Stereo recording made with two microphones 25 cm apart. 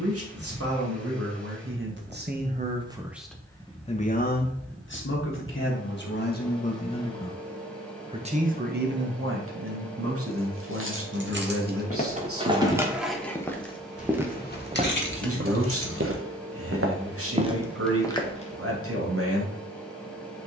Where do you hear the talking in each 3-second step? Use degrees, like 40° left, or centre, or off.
50° right, 40° left, centre, 60° right, 60° right, 60° right, 60° right.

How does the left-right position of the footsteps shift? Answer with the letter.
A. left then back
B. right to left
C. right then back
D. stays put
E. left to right
C.